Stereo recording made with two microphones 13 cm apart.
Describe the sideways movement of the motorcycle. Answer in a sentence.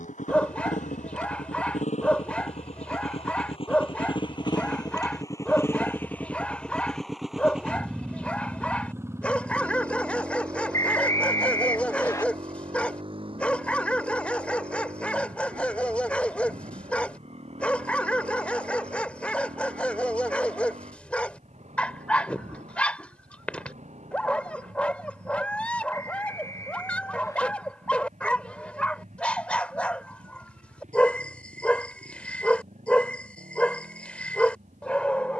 You can hear the motorcycle move to the right.